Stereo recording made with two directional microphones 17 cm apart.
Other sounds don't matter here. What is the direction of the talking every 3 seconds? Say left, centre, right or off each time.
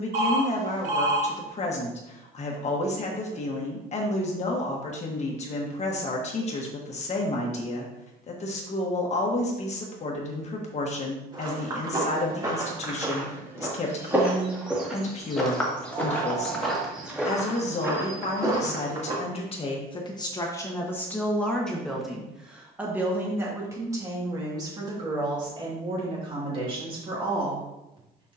left, left, left, left, left, left, left, centre, right, right.